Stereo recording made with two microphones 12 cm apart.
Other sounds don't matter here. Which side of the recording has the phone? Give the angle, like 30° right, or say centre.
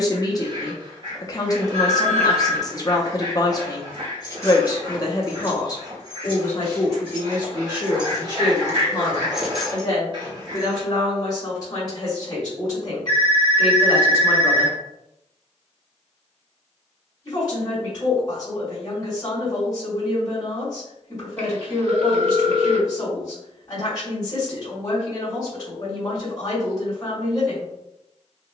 60° right.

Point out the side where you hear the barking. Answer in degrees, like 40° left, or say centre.
40° right.